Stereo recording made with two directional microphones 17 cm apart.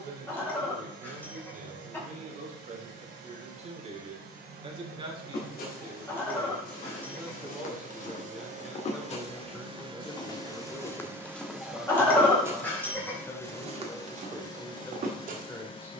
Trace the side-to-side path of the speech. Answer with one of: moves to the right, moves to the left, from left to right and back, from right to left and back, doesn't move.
moves to the left.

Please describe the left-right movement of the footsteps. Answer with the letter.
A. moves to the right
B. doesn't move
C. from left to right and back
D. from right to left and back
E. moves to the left
A.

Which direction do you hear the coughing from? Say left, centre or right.
centre.